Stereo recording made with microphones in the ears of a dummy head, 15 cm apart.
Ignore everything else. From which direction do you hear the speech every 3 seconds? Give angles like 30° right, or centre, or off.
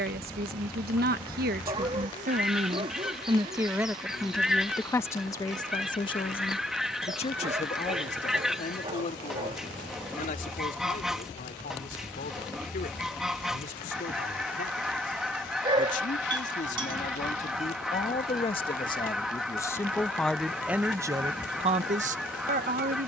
60° right, 10° left, 40° left, 50° left, 50° left, 50° left, 20° left, 40° right.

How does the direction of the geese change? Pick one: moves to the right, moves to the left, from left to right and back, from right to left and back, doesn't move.
doesn't move.